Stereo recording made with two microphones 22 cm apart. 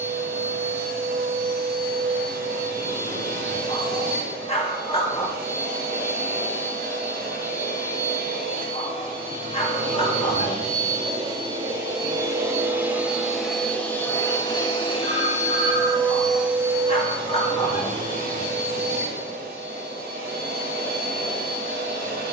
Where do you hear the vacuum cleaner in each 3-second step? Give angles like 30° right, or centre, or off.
40° right, 40° right, 40° right, 30° right, centre, centre, 40° right, 40° right.